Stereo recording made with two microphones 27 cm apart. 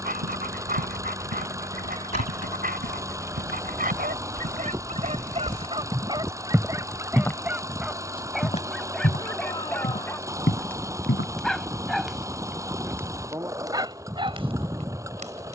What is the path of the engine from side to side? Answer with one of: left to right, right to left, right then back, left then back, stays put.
stays put.